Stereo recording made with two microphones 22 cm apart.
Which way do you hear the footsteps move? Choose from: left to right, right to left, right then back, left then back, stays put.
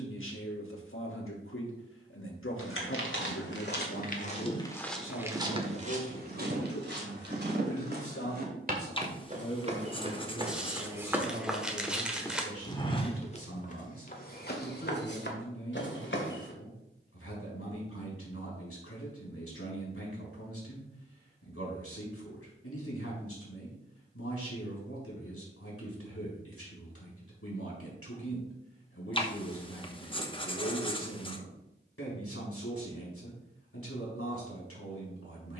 right then back.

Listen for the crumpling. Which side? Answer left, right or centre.
centre.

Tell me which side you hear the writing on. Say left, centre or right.
left.